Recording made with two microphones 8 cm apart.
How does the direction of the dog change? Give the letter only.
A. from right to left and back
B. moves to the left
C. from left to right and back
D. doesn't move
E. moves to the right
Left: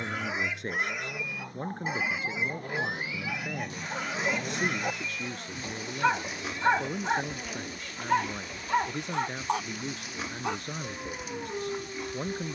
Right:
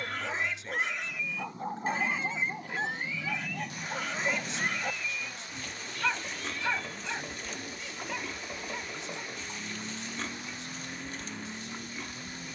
B.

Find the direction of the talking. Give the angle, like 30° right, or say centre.
60° left.